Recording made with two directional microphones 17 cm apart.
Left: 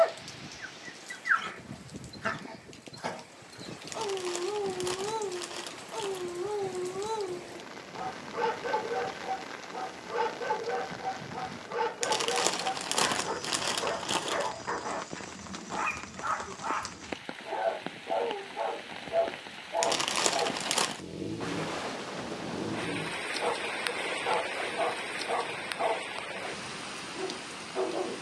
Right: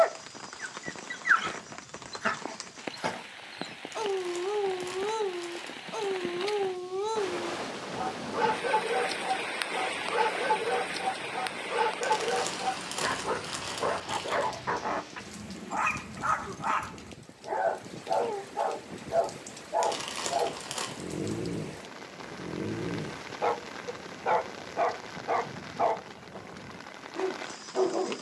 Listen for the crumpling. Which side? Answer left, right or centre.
left.